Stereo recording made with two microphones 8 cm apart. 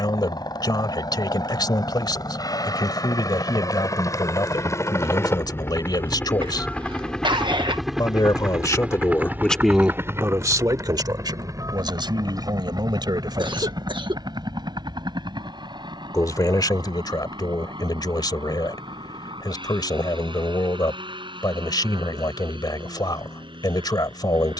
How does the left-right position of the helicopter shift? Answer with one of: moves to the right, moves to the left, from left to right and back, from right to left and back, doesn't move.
moves to the right.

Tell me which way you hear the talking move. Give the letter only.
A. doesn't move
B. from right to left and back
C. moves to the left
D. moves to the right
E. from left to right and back
E.